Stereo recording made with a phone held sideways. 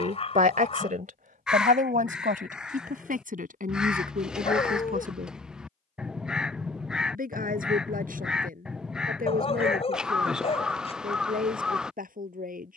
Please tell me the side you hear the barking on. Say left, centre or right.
left.